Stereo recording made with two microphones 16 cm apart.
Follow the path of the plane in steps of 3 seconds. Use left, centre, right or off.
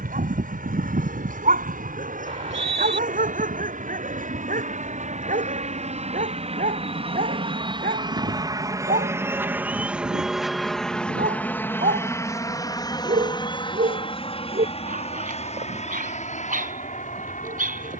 right, right, right, centre, left, left.